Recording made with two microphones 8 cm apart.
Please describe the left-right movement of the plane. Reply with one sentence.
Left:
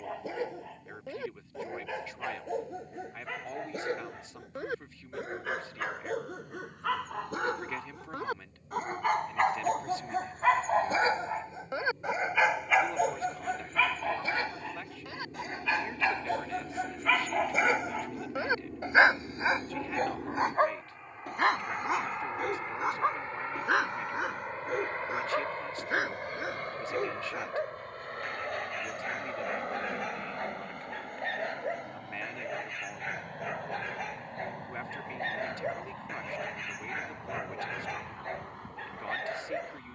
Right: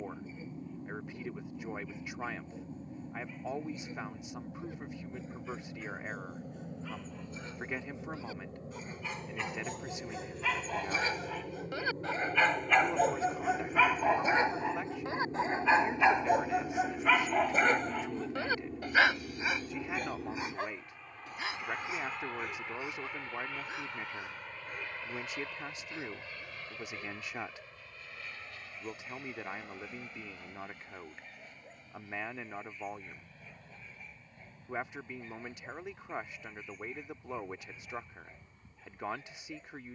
You can hear the plane move from right to left.